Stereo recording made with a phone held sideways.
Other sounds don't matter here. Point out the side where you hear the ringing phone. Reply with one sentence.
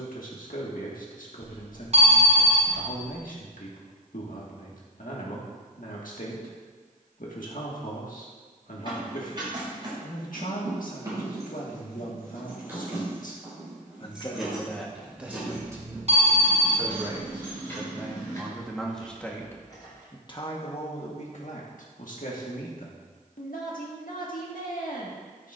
You can hear the ringing phone on the right.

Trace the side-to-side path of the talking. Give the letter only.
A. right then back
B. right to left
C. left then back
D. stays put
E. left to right
A.